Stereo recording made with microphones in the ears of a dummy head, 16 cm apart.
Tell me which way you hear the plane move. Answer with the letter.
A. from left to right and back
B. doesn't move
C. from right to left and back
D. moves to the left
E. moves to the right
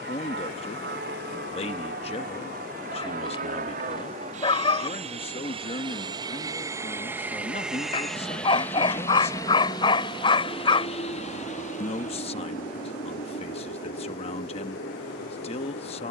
D.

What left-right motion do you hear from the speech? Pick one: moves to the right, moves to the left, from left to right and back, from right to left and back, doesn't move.
doesn't move.